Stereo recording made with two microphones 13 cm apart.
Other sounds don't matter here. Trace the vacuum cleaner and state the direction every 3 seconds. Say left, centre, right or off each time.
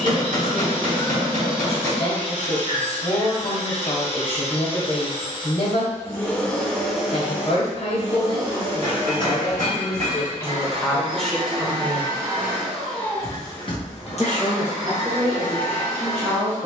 left, left, centre, right, left, left.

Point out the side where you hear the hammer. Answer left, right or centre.
right.